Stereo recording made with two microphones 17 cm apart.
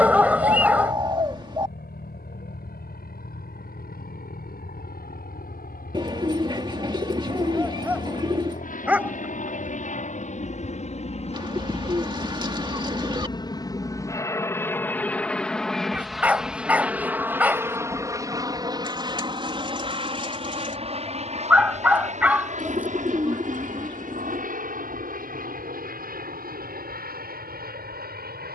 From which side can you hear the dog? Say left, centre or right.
centre.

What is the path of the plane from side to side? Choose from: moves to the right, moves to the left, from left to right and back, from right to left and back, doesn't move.
moves to the right.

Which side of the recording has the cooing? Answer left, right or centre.
right.